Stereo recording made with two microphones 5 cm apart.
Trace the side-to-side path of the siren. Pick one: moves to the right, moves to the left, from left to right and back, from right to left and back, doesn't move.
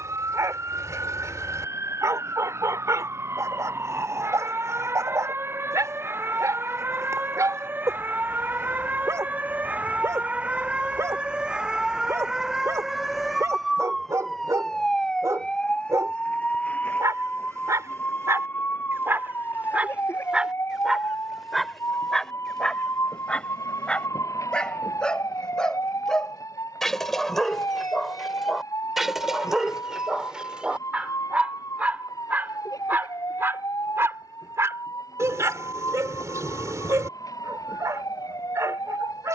moves to the left.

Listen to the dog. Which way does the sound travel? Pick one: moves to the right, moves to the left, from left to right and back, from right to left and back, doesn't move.
from right to left and back.